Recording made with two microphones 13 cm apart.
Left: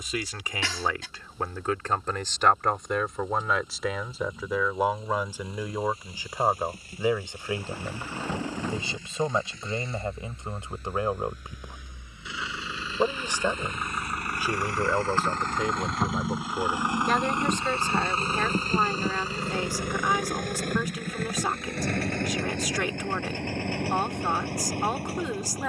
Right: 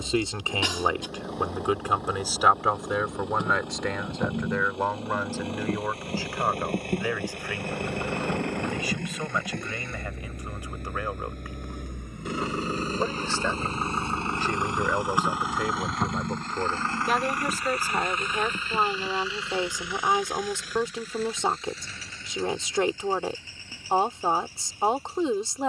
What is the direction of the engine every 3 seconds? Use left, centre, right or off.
right, right, right, right, right, centre, left, left, left.